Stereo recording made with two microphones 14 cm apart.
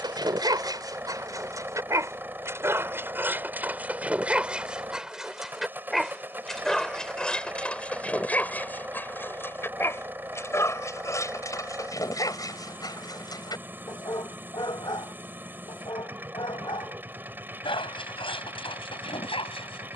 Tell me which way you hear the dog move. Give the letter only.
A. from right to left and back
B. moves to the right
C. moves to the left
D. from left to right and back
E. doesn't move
C.